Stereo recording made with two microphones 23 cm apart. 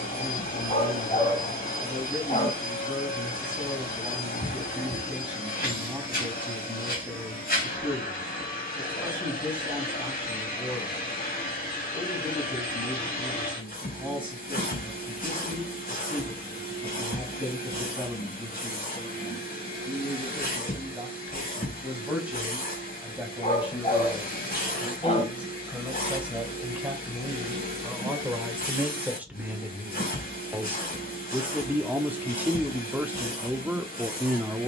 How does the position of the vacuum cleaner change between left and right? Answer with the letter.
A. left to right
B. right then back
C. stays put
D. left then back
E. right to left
C.